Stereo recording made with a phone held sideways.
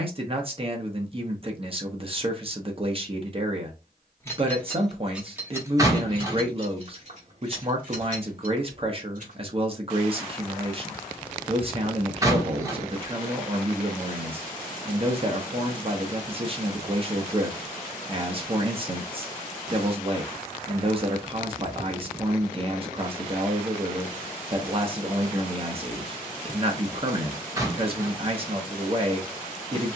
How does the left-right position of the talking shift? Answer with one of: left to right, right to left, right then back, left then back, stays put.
stays put.